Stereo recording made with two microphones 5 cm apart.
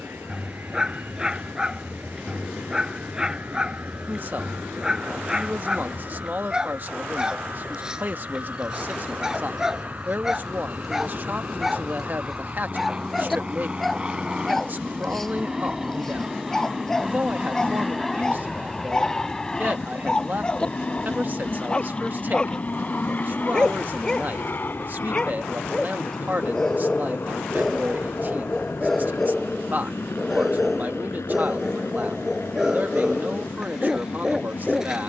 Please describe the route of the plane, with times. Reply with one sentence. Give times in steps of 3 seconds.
In this clip you hear the plane on the right from 0 s, in the centre from 15 s and on the left from 21 s.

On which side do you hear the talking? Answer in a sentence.
In this clip you hear the talking on the right.